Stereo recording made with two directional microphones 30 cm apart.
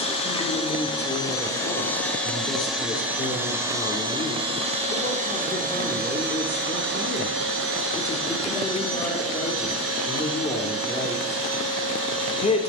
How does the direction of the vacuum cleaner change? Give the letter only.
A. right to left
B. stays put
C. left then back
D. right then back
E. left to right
E.